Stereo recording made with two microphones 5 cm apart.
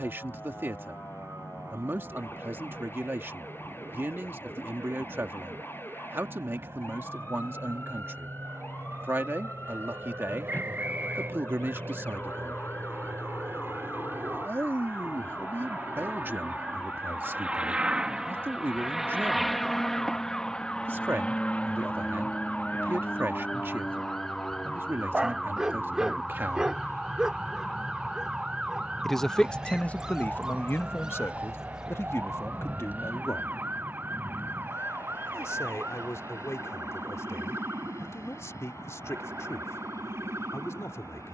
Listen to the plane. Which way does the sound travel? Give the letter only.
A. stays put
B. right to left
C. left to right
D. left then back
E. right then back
B.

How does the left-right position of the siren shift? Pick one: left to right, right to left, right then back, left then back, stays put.
left to right.